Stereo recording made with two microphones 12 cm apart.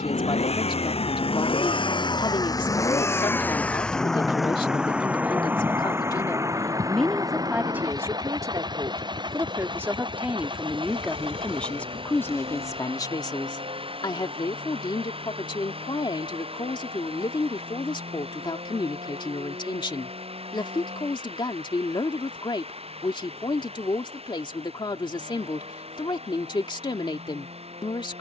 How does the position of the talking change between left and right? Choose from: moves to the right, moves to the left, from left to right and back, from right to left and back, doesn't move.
from left to right and back.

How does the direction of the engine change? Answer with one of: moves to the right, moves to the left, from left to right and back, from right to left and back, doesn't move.
moves to the right.